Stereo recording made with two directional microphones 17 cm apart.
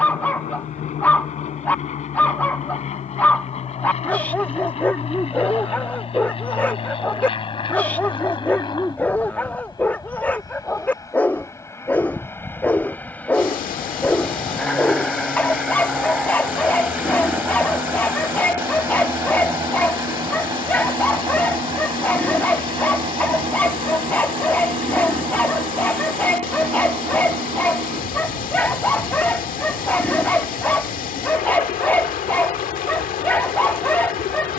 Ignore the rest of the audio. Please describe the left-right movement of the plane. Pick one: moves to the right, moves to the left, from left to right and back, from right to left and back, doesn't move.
moves to the right.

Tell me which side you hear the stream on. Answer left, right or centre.
left.